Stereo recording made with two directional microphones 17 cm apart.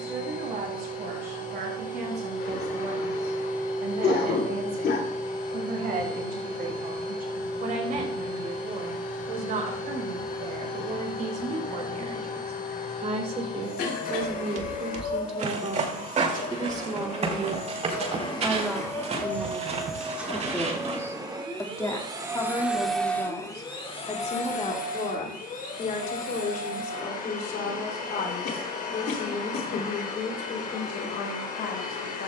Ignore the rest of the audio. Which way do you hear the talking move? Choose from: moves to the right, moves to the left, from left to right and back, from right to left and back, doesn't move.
moves to the left.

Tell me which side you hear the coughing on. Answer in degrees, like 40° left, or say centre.
70° left.